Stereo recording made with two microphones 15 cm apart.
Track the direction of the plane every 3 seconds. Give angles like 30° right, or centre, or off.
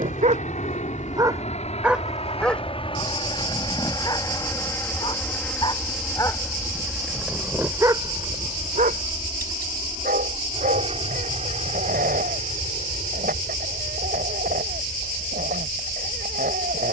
50° left, 20° left, 10° right, 40° right, 50° right, 50° right.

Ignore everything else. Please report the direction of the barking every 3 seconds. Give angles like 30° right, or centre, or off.
20° right, 30° left, 10° right, 70° right, 70° right, 70° right.